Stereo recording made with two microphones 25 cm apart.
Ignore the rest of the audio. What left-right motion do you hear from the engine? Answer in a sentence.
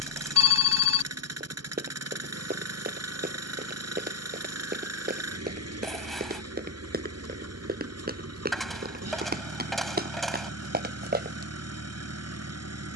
In this clip you hear the engine stay put.